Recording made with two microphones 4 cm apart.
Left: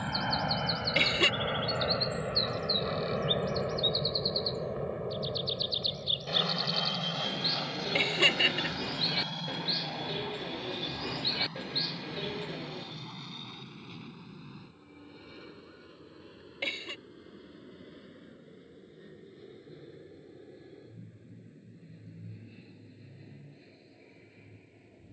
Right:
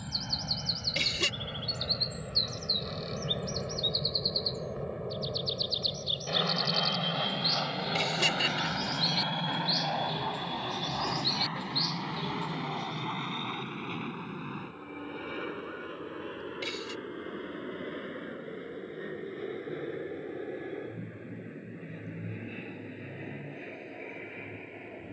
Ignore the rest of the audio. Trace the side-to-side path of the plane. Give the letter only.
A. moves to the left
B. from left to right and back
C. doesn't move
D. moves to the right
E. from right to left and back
D.